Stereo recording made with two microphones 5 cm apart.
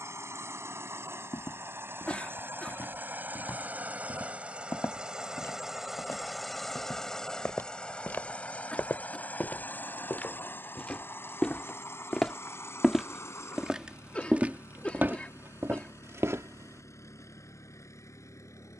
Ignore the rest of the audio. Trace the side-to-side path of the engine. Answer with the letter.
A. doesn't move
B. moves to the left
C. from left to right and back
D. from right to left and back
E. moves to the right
B.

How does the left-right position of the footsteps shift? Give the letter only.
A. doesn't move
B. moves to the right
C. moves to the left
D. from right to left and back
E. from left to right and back
B.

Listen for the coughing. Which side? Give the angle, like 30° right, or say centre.
20° left.